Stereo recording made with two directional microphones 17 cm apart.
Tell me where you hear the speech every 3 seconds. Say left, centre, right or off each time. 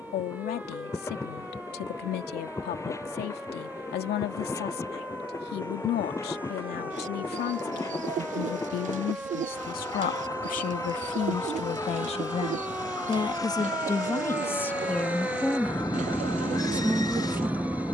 left, left, left, left, left, centre.